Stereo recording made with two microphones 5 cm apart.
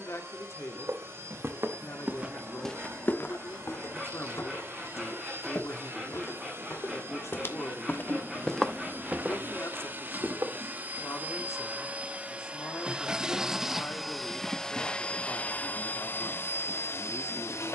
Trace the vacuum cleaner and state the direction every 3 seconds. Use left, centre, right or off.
right, right, right, right, centre, left.